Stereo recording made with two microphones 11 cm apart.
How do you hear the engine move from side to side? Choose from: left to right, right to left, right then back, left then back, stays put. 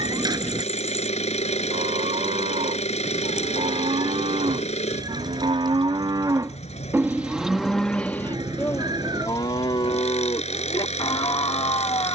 stays put.